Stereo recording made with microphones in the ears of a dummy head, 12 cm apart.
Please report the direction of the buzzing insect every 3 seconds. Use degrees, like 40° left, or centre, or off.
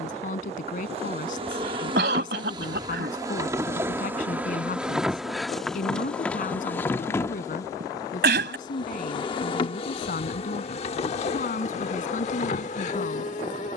40° right, 10° right, 20° left, 40° left, 50° left.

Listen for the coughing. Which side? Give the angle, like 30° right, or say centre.
80° right.